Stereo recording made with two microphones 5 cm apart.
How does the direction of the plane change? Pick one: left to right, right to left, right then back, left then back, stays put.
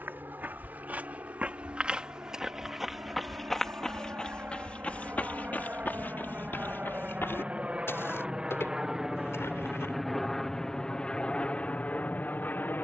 right to left.